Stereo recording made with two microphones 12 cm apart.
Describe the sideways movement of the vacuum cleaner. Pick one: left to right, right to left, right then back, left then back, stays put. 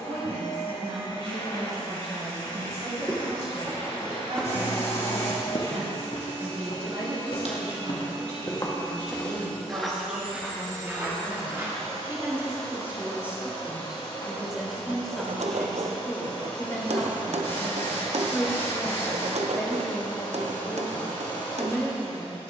stays put.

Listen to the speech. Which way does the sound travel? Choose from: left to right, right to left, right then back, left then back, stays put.
right to left.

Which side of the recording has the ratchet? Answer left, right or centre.
right.